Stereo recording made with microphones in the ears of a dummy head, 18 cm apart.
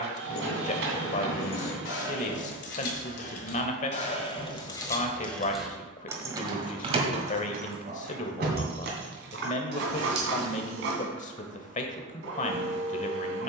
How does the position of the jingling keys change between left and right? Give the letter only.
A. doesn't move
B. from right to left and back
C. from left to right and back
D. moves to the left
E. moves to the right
E.